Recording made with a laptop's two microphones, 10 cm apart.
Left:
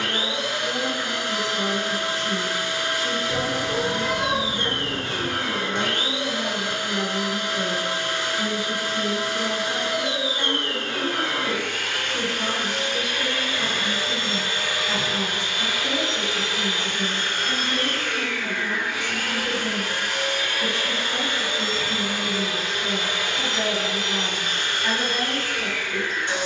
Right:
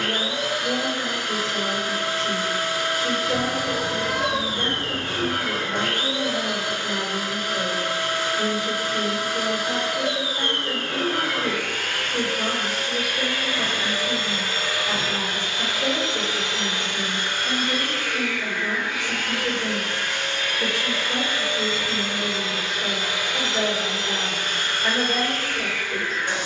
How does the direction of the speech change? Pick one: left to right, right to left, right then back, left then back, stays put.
stays put.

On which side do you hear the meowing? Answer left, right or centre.
right.